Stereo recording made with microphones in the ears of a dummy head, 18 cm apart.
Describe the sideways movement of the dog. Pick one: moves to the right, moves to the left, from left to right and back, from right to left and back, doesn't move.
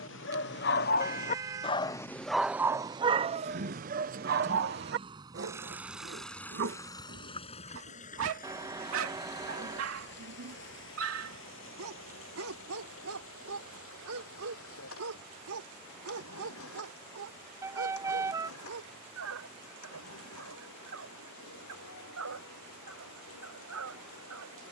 moves to the right.